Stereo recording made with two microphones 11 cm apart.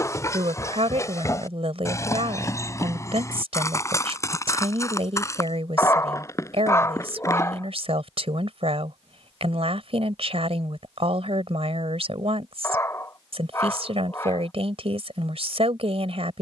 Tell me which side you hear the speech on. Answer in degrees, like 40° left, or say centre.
70° right.